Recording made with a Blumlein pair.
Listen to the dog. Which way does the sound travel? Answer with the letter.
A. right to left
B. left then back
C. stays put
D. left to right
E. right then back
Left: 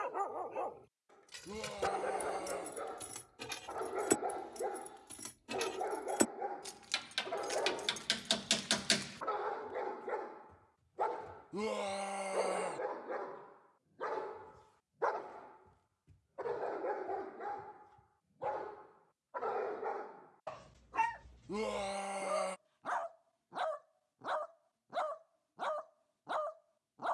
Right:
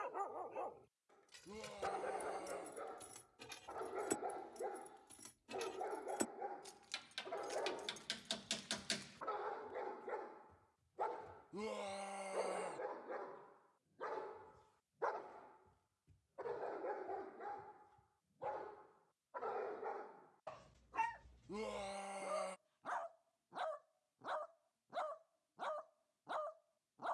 C.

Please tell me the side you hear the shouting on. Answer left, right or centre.
left.